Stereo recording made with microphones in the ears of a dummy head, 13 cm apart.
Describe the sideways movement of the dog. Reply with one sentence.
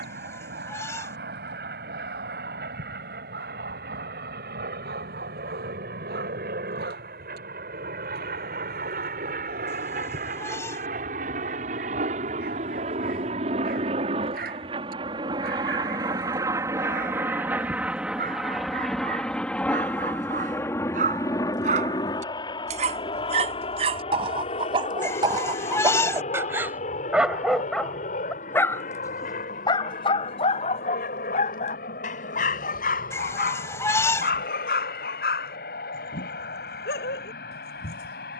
In this clip you hear the dog move from right to left.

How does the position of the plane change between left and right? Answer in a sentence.
In this clip you hear the plane move from right to left.